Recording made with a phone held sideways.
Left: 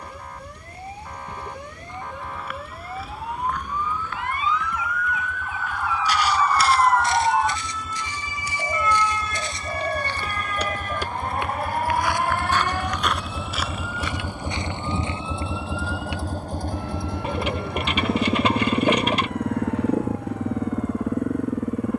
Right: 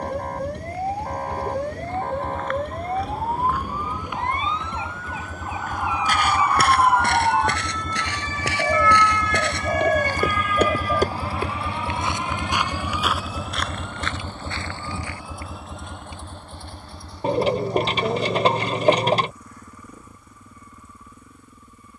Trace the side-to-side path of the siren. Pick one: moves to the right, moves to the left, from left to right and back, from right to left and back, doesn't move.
moves to the left.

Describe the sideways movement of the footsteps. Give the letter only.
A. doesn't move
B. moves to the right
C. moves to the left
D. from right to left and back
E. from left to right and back
E.